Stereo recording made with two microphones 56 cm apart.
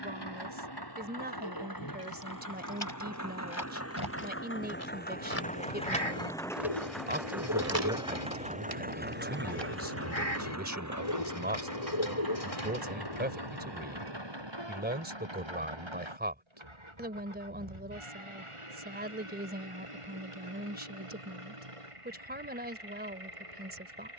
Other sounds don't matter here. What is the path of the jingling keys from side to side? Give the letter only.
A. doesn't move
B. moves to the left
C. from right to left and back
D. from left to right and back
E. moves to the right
E.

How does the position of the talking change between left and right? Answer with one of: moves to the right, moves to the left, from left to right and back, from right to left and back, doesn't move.
doesn't move.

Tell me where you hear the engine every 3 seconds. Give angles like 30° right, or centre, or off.
40° left, 20° left, centre, 30° right, 40° right, 50° right, 60° right, 70° right.